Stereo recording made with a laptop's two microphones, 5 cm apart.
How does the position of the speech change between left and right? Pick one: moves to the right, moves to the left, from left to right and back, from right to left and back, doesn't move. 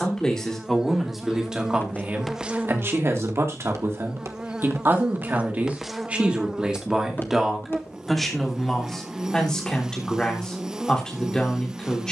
from left to right and back.